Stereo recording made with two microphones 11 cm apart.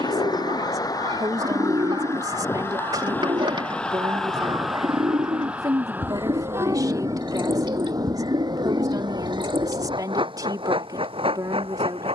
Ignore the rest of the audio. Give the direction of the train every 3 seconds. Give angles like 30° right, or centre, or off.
30° left, centre, 30° right, 50° right.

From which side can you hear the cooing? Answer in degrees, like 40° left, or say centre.
50° right.